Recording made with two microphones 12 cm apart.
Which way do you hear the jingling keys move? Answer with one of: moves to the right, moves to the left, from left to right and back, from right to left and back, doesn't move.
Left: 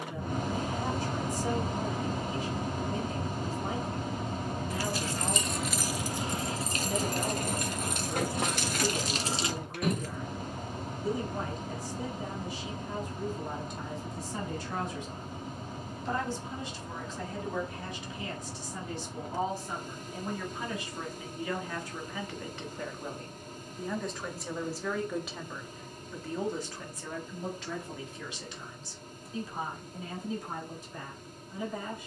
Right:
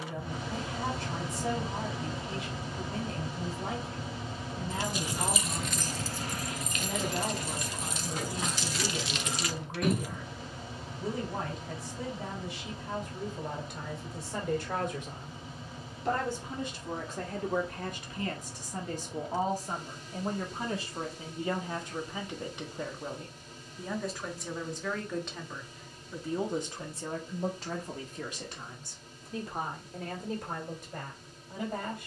from right to left and back.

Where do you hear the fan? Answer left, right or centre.
left.